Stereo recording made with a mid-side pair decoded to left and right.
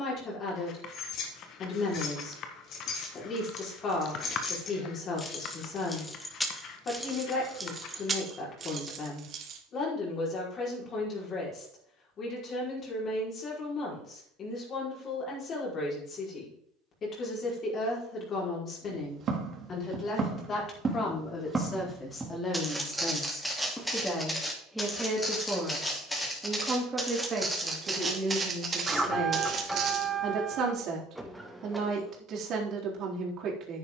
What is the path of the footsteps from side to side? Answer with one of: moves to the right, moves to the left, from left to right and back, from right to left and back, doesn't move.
from right to left and back.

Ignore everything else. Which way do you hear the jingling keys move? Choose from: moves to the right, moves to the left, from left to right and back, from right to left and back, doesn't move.
moves to the right.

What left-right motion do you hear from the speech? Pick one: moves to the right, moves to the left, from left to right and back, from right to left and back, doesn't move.
moves to the right.